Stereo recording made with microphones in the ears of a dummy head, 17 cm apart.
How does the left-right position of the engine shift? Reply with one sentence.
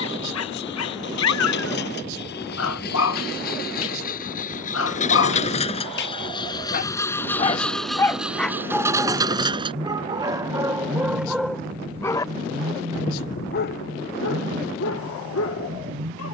You can hear the engine travel towards the right.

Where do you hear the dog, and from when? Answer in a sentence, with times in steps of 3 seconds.
In this clip you hear the dog on the left from 0 s, in the centre from 9 s and on the left from 12 s.